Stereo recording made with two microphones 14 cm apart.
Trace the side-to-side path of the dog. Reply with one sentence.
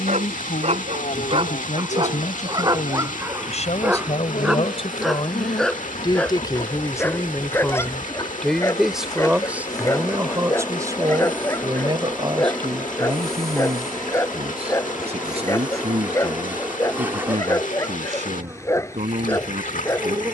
In this clip you hear the dog move from right to left.